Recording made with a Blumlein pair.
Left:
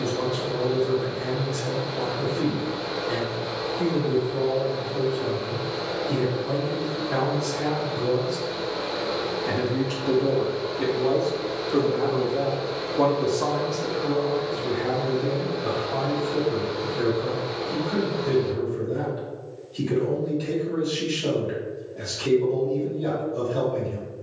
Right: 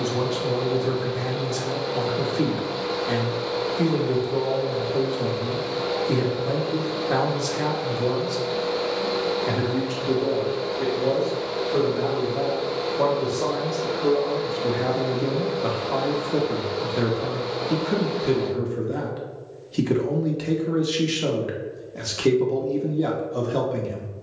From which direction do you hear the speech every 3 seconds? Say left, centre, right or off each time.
right, right, right, centre, centre, right, right, right.